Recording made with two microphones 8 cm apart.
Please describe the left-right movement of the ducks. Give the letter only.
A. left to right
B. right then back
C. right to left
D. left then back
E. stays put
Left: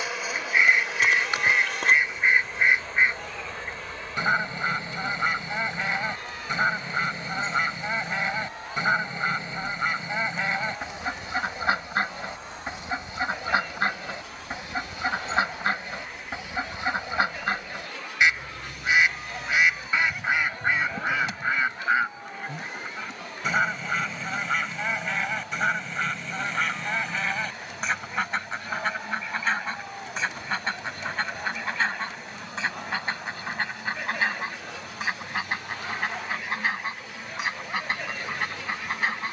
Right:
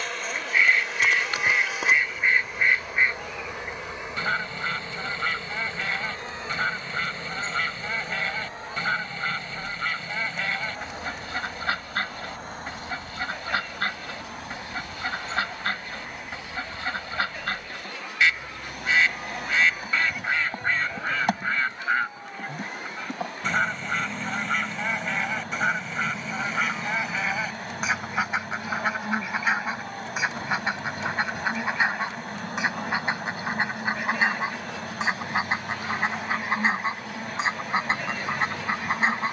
A.